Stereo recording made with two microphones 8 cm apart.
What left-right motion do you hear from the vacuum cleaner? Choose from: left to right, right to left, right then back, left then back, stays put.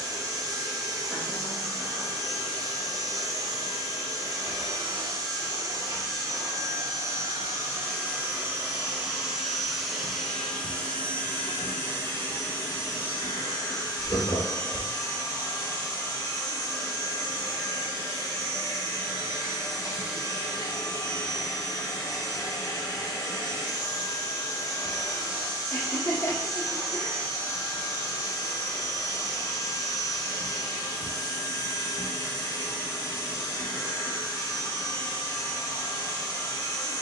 right to left.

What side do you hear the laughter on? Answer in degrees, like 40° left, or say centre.
50° left.